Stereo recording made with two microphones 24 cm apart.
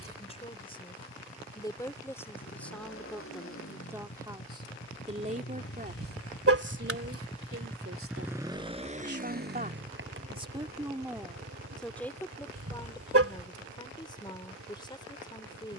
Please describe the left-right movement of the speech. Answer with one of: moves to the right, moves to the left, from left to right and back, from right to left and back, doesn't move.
from left to right and back.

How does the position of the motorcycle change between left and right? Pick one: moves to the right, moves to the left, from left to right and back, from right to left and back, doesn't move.
moves to the right.